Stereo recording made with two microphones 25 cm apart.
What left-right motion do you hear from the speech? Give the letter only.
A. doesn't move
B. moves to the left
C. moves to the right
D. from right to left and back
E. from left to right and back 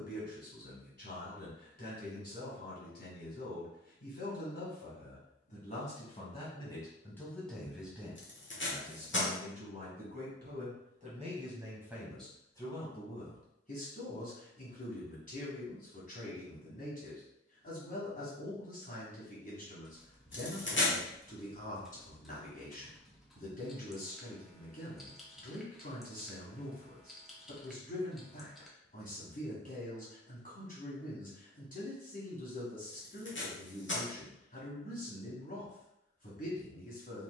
E.